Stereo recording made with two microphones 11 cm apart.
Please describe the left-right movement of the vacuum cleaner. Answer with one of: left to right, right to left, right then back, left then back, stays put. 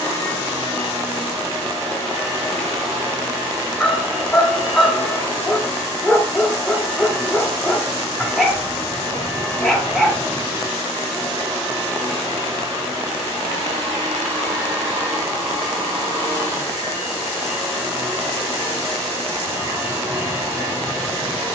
stays put.